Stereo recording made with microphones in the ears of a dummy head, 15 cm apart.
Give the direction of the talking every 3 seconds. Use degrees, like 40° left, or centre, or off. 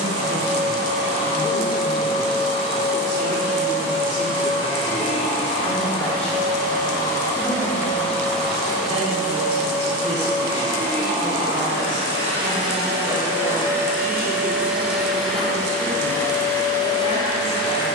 20° left, 20° left, 10° right, 40° right, 60° right, 70° right.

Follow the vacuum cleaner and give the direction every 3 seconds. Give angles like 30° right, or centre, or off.
40° left, 40° left, 20° left, 20° right, 20° right, 20° left.